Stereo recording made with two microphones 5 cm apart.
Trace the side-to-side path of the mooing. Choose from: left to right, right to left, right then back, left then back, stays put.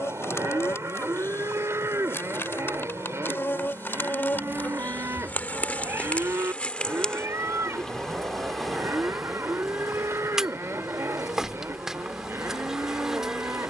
stays put.